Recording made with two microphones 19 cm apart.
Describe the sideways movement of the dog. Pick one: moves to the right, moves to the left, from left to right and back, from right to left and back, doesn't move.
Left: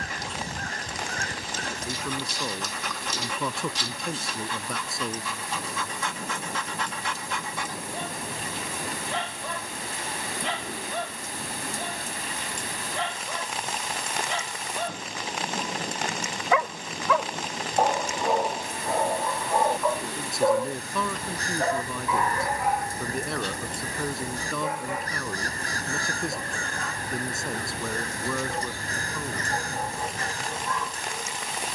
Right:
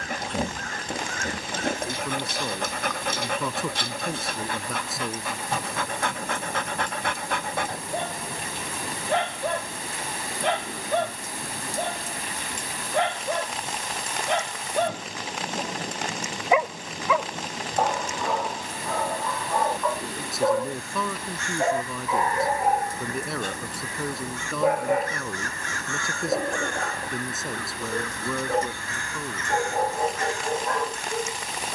from right to left and back.